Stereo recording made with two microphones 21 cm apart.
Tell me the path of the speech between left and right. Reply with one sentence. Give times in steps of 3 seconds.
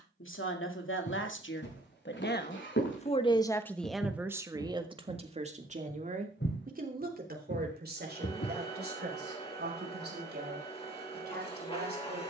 In this clip you hear the speech on the left from 0 s, in the centre from 3 s and on the right from 6 s.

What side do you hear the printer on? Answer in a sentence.
You can hear the printer on the left.